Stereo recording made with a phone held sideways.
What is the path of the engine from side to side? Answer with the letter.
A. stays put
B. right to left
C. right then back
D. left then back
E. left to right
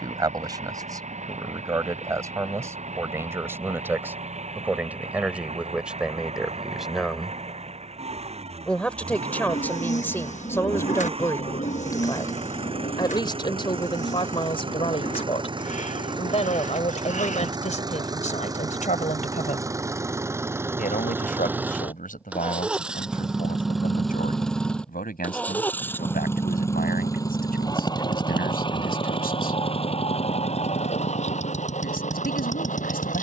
B.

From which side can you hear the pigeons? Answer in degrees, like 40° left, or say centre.
50° left.